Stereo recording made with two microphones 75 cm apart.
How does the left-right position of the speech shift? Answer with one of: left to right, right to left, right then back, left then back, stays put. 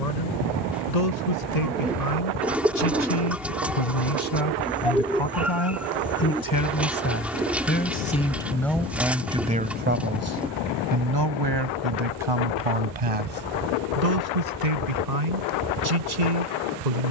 left to right.